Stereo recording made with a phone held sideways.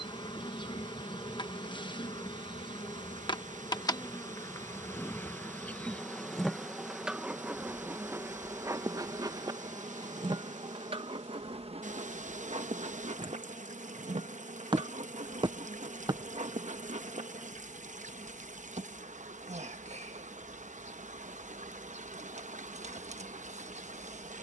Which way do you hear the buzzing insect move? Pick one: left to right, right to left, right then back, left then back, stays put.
left to right.